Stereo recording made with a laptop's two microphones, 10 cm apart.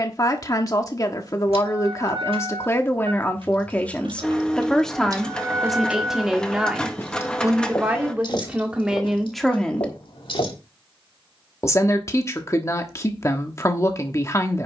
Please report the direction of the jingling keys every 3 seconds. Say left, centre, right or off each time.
right, right, left, left, off.